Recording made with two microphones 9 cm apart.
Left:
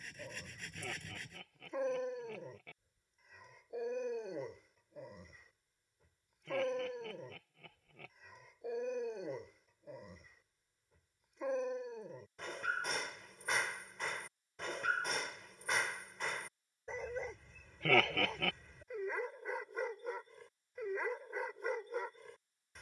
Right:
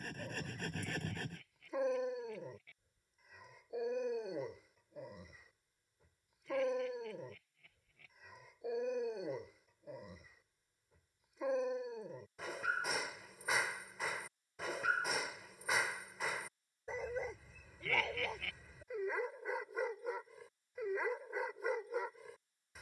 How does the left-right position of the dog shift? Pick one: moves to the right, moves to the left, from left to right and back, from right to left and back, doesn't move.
doesn't move.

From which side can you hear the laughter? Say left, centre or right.
left.